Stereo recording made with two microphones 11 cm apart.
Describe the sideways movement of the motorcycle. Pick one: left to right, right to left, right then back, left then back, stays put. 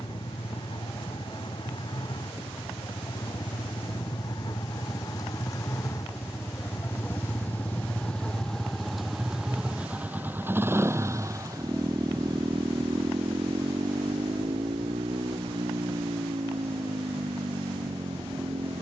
left to right.